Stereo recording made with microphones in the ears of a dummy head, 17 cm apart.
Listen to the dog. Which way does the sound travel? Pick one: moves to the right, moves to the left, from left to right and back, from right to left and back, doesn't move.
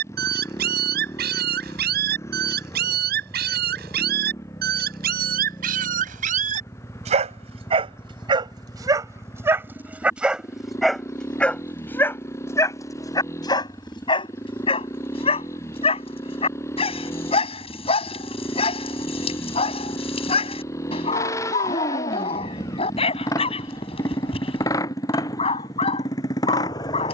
moves to the left.